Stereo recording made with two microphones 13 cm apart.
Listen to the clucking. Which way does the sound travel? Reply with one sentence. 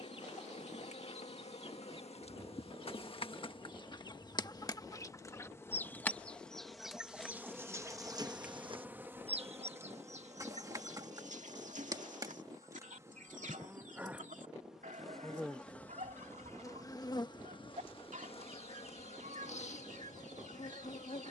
You can hear the clucking go from the left side to the right.